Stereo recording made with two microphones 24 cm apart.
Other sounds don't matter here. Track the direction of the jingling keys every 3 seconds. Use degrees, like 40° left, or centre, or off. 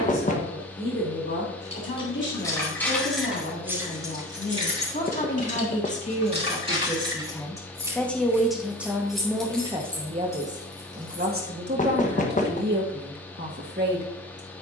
10° left, 20° right, 20° right, 10° left, off.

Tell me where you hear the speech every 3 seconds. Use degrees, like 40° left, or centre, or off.
50° left, 40° left, 10° left, 30° right, 50° right.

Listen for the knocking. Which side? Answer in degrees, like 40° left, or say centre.
30° left.